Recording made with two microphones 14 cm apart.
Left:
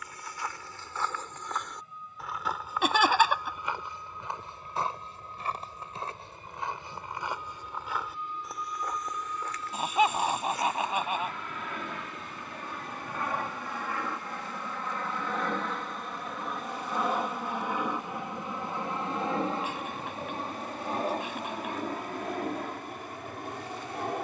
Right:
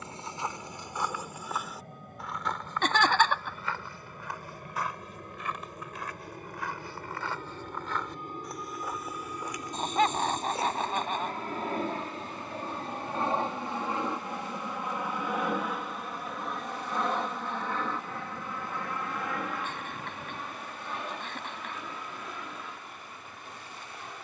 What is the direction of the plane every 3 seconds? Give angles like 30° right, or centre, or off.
70° right, 60° right, 50° right, 40° right, 30° right, centre, 30° left, 50° left.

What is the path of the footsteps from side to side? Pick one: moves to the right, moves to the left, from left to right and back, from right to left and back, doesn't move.
from right to left and back.